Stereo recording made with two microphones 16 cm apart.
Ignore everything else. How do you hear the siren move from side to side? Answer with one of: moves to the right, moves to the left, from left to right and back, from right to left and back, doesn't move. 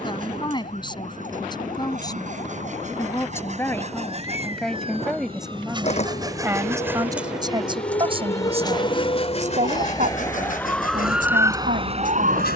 moves to the right.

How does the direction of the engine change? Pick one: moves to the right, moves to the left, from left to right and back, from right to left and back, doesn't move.
moves to the left.